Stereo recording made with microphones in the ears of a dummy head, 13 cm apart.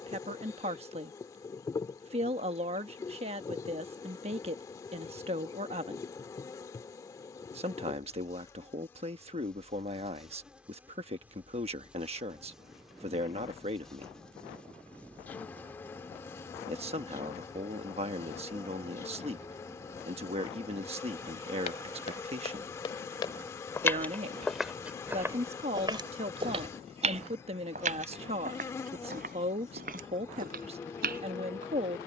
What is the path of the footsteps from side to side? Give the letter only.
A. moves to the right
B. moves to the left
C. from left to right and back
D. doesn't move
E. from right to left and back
A.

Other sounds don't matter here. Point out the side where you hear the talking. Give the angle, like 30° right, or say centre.
40° right.